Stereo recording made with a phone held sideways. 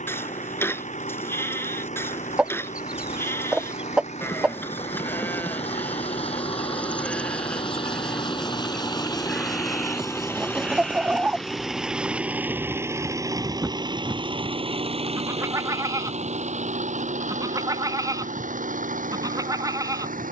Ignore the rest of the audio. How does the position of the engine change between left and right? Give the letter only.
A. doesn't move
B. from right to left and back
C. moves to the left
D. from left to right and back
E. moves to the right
E.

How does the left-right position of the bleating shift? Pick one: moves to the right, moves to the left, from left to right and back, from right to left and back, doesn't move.
moves to the right.